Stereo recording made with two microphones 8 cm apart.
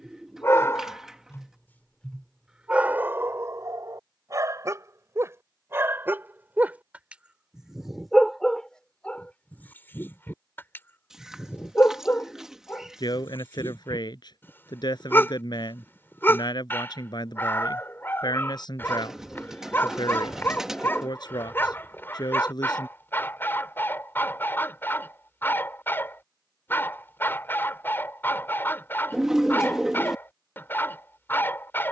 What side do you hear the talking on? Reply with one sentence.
You can hear the talking on the left.